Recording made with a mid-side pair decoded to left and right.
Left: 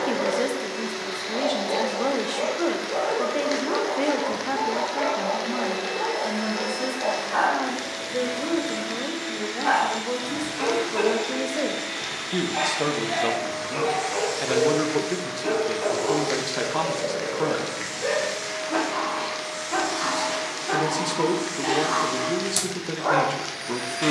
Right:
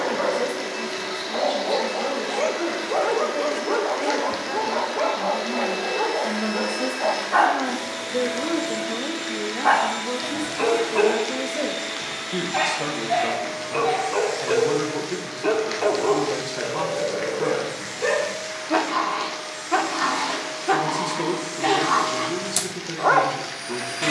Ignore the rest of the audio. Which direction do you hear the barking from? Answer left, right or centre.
right.